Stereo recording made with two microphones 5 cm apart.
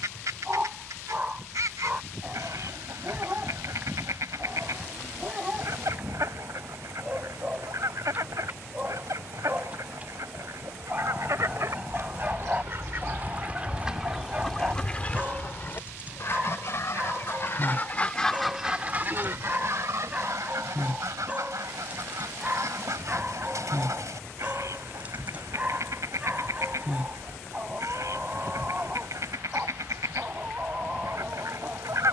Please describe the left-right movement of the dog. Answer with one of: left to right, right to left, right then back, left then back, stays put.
stays put.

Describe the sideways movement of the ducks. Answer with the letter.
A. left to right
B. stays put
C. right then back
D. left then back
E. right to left
D.